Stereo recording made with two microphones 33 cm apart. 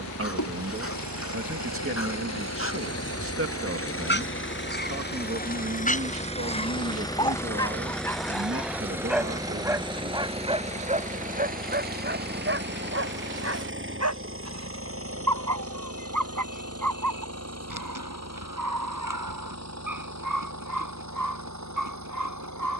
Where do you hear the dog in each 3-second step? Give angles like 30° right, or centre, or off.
40° left, 30° left, 10° left, 20° right, 50° right, 70° right, 70° right, 70° right.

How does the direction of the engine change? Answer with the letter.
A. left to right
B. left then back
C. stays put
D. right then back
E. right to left
A.